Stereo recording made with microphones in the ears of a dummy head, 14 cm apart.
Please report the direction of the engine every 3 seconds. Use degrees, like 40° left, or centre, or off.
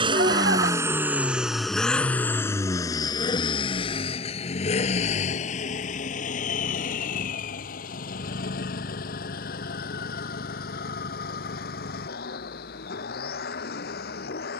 centre, 40° left, 60° left, 60° left, 70° left.